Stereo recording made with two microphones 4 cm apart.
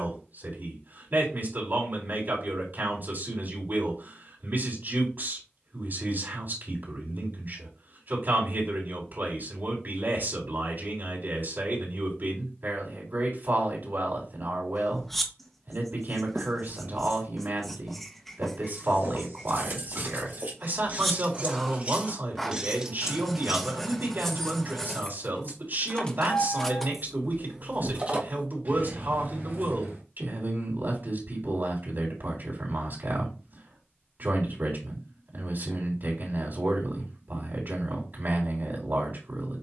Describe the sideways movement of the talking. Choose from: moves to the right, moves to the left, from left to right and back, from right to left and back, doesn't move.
doesn't move.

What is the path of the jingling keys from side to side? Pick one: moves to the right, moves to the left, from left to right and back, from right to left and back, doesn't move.
from right to left and back.